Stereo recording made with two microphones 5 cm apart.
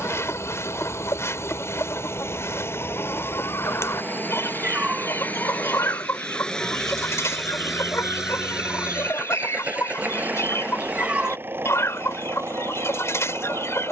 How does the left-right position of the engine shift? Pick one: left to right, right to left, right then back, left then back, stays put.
left to right.